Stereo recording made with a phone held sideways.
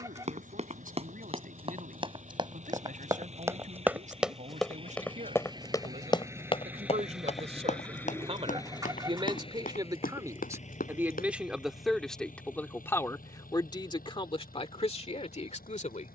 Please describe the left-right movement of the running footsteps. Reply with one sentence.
In this clip you hear the running footsteps travel towards the left.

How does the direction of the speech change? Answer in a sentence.
You can hear the speech travel towards the left.